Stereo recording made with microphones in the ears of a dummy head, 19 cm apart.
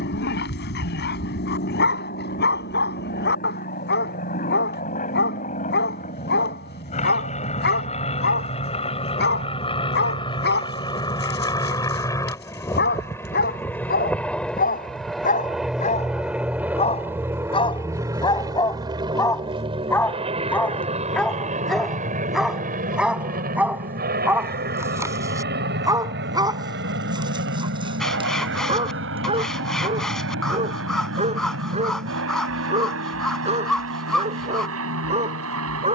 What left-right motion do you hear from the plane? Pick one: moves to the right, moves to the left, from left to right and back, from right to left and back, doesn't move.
moves to the right.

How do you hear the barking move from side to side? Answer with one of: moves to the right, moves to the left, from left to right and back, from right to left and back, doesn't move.
moves to the right.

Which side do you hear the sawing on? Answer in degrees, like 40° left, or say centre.
centre.